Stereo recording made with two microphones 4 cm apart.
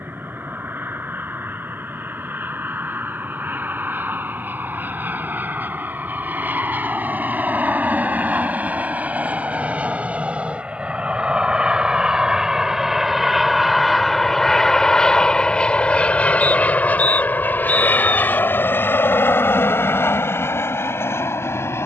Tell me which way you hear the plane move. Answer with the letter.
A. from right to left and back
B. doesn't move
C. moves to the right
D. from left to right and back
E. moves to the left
E.